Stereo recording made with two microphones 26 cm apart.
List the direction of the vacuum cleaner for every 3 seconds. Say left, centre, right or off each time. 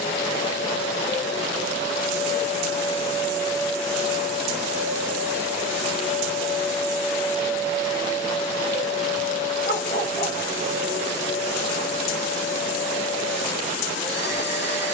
left, centre, centre, left, left.